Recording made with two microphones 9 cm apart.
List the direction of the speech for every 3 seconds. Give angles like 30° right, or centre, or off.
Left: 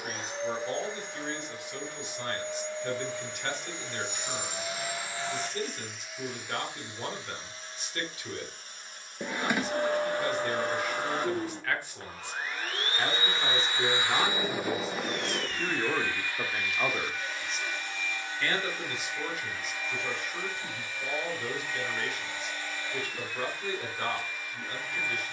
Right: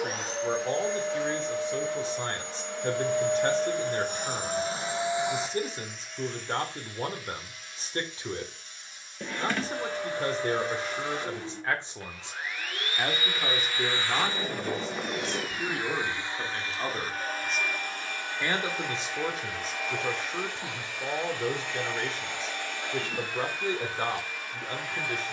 30° right, 30° right, 30° right, 30° right, 10° right, 10° left, 30° right, 30° right, 30° right.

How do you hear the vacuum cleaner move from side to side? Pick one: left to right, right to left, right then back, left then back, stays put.
left then back.